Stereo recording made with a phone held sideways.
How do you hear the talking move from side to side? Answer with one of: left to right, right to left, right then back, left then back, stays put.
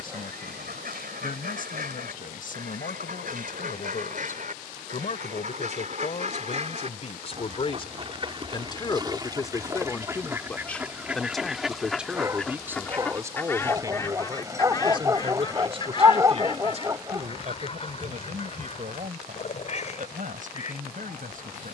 left to right.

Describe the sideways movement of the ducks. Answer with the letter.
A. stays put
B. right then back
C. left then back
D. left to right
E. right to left
E.